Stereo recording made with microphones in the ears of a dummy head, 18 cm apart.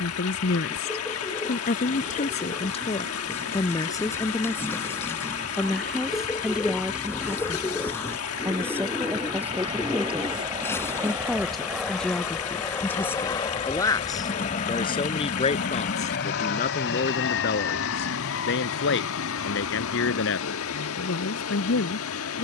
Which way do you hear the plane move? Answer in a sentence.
In this clip you hear the plane move from right to left.